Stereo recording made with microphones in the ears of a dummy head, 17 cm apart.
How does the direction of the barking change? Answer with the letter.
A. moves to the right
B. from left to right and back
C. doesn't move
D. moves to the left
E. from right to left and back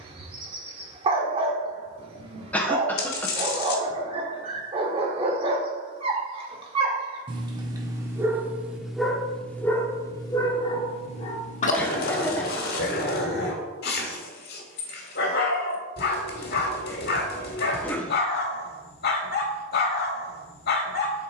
D.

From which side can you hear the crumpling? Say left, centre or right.
left.